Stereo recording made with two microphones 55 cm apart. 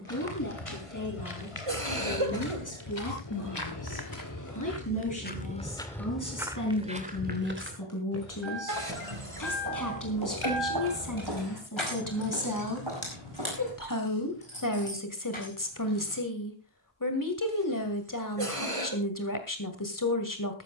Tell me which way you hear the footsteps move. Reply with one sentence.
In this clip you hear the footsteps move to the right.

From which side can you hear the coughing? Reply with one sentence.
In this clip you hear the coughing on the right.